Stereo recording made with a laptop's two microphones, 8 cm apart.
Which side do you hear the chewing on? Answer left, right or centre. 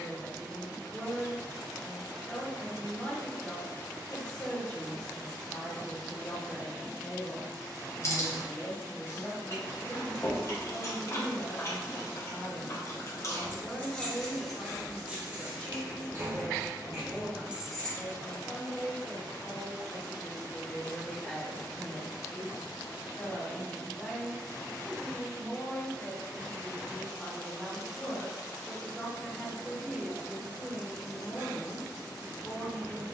left.